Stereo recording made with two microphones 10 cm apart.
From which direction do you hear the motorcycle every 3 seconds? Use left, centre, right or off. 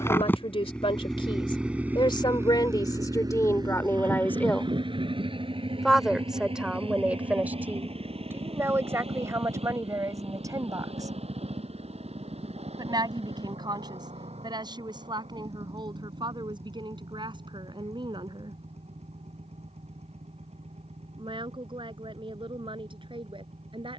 centre, right, right, right, right, right, right, right.